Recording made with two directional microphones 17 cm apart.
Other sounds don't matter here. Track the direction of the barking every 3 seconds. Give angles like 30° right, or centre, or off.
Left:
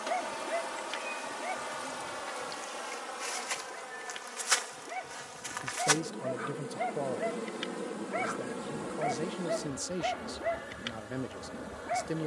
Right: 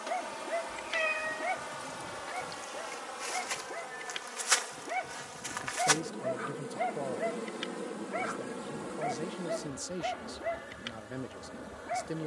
20° right, 30° right, centre, 10° left.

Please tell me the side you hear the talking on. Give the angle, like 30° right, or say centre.
10° left.